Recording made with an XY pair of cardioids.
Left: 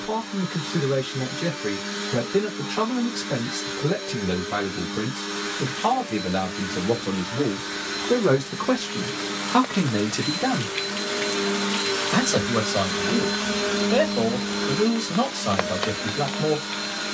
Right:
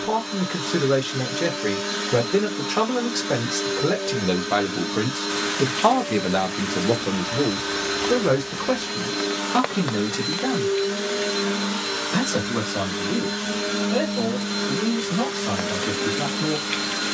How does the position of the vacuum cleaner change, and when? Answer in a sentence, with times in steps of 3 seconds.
In this clip you hear the vacuum cleaner on the right from 0 s, in the centre from 12 s and on the right from 15 s.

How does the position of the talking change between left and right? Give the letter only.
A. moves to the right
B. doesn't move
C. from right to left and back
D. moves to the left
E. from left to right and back
D.